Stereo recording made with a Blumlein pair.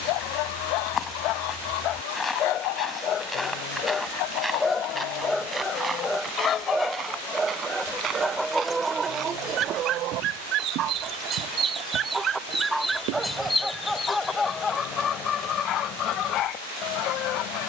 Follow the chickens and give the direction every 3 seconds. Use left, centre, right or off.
left, left, centre, right, centre, left.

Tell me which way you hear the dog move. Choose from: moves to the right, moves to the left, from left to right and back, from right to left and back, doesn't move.
from left to right and back.